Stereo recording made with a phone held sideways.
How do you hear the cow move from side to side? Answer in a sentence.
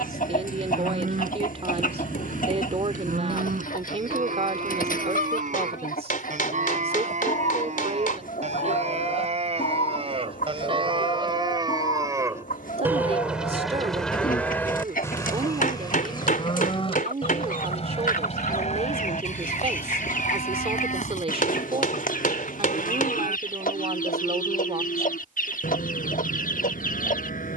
You can hear the cow go from the right side to the left.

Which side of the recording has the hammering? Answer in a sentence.
You can hear the hammering on the left.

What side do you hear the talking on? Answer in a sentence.
In this clip you hear the talking on the right.